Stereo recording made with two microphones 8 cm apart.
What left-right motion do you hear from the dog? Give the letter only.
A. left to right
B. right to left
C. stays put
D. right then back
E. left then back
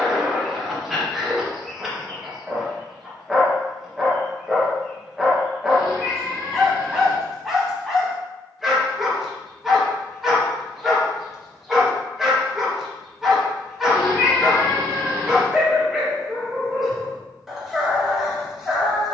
C.